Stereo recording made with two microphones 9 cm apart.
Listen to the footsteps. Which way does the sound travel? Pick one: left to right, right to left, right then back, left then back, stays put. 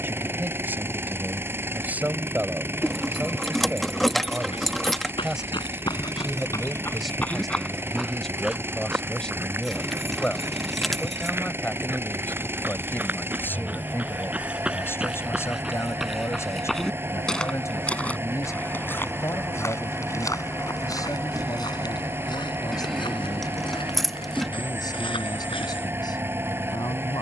right then back.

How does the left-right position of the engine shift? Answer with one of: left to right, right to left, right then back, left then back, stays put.
stays put.